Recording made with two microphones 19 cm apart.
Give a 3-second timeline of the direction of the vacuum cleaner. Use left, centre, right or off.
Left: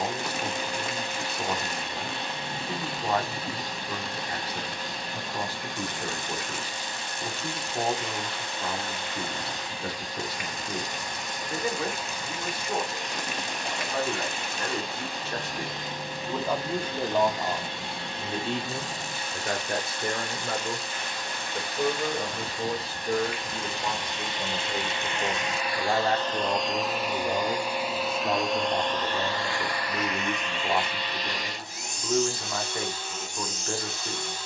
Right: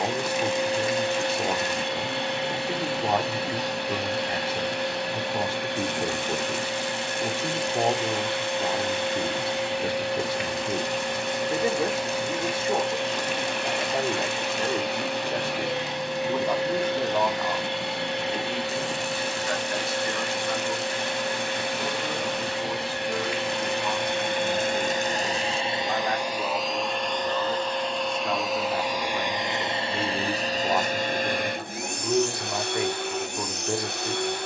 right, right, right, right, right, right, right, right, right, centre, right, right.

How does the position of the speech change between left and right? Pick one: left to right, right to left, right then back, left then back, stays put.
left then back.